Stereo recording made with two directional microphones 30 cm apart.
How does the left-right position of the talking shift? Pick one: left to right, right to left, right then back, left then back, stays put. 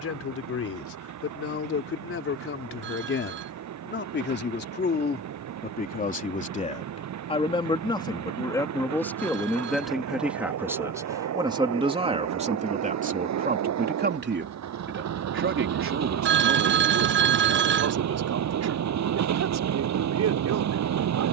left to right.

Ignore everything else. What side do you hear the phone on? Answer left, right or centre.
right.